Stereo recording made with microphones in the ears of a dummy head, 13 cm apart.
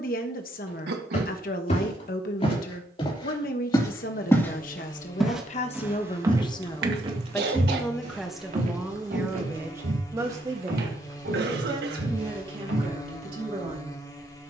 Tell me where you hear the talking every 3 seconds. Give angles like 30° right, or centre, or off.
60° left, 50° left, 10° left, 20° right, 30° right.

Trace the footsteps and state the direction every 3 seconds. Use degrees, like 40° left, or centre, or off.
40° left, 10° left, 40° right, 70° right, 80° right.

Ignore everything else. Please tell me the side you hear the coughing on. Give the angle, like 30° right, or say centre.
70° right.